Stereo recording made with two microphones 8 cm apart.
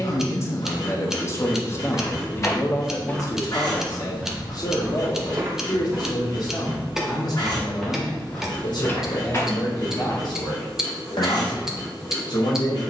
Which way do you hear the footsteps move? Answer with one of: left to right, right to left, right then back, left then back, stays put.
right then back.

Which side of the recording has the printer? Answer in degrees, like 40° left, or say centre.
60° left.